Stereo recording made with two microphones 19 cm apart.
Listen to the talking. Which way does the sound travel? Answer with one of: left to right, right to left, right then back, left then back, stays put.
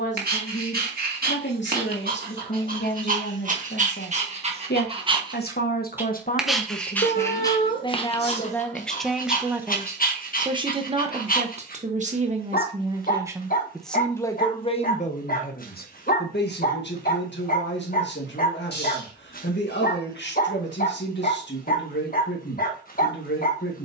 right then back.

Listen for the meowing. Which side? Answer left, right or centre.
left.